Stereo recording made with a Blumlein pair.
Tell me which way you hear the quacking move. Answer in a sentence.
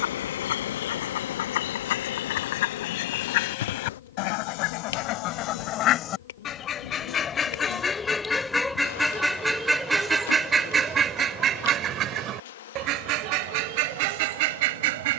You can hear the quacking move to the right.